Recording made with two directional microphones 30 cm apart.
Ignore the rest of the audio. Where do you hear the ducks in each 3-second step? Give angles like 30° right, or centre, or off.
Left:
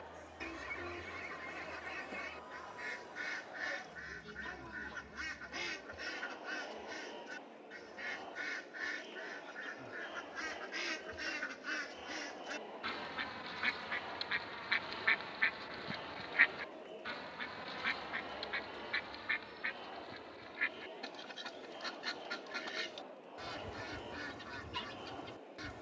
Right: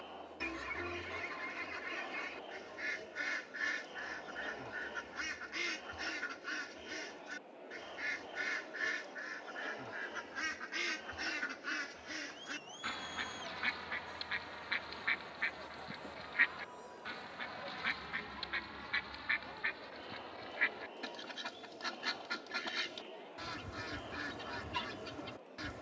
30° right, 30° right, 30° right, 20° right, centre, 10° left, 20° right, 30° right, 30° right.